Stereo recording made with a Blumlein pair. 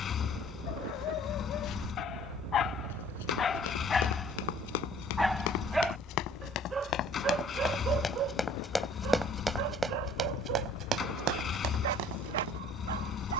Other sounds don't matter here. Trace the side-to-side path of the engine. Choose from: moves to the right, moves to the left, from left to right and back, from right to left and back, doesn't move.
doesn't move.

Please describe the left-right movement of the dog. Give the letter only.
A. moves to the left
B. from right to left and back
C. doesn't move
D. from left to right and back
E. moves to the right
E.